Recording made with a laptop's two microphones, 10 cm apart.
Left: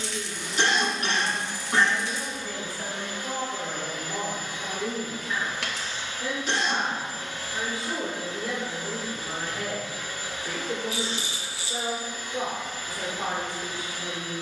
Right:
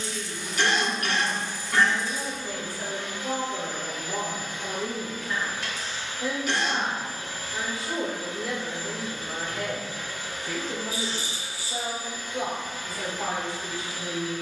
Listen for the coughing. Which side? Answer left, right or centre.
left.